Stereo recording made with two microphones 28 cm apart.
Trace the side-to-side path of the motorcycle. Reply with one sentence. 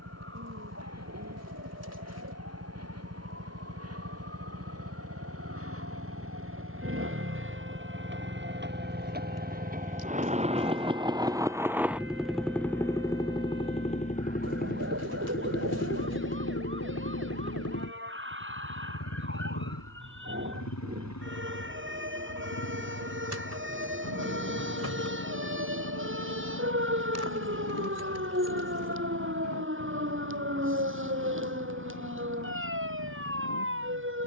In this clip you hear the motorcycle move to the left.